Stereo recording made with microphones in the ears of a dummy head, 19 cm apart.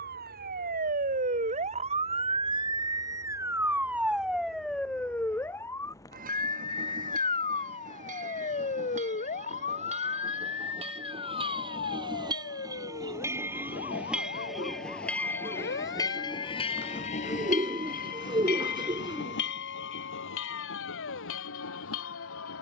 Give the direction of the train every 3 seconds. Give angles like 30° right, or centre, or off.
50° right, 50° right, 40° right, 30° right, 10° right, 20° left, 60° left, 80° left.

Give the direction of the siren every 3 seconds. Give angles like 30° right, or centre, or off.
40° right, centre, 30° left, 40° left, 50° left, 60° left, 60° left, 60° left.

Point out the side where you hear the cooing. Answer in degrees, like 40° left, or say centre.
20° right.